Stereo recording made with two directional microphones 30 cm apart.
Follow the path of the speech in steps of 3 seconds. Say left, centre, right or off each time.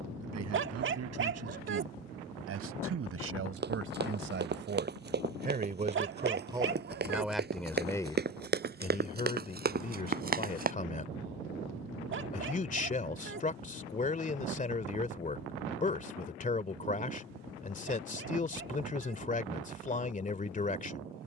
right, right, centre, left, left, left, left.